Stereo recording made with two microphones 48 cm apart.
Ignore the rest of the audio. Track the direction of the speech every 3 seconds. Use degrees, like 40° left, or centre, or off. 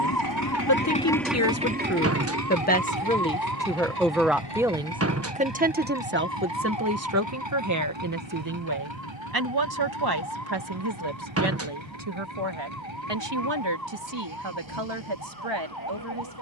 30° left, centre, 30° right, 50° right, 60° right, 70° right.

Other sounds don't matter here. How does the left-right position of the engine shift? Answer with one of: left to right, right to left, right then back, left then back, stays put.
left to right.